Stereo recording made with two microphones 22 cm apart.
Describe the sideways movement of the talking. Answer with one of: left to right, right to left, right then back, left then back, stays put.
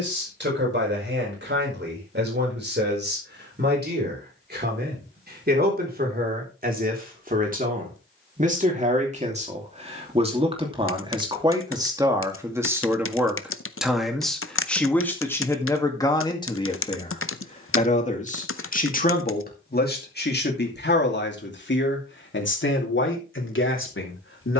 right to left.